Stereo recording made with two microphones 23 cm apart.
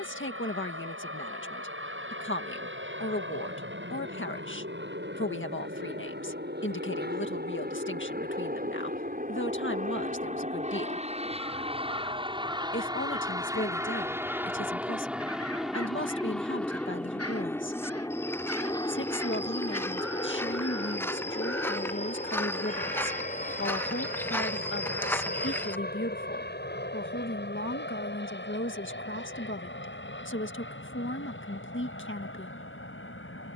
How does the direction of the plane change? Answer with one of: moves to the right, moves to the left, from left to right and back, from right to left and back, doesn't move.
moves to the left.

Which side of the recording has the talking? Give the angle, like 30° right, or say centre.
50° left.